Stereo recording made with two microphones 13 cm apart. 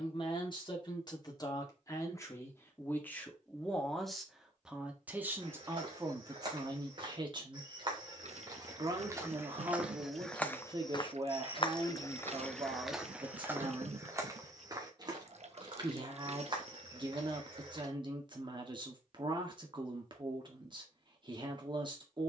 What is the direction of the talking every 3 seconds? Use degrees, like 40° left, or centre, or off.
30° left, centre, 30° right, 40° right, 40° right, 40° right, 40° right, 40° right.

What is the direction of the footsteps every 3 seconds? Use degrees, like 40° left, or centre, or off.
off, 40° right, 40° right, 10° left, 10° right, 40° right, off, off.